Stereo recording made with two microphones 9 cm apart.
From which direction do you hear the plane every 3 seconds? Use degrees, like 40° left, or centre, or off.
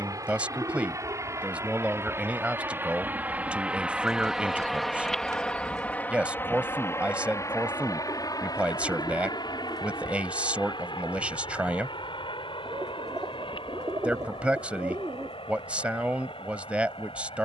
40° right, centre, 40° left, 60° left, 70° left, 80° left.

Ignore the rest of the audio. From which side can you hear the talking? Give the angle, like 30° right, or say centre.
20° right.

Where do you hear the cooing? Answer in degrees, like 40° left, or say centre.
50° right.